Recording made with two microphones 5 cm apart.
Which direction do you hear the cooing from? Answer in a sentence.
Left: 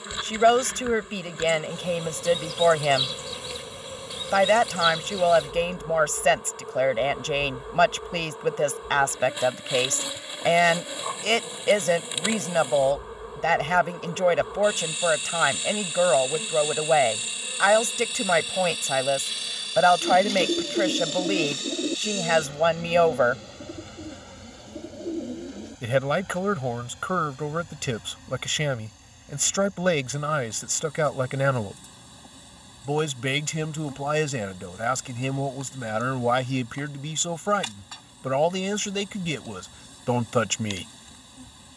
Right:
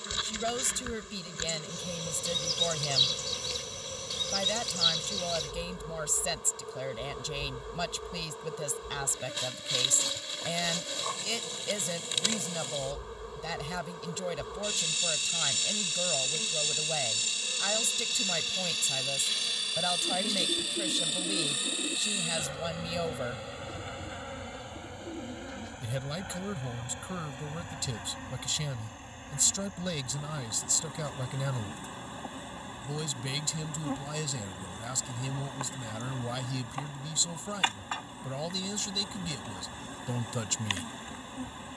In this clip you hear the cooing on the left.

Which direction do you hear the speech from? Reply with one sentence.
In this clip you hear the speech on the left.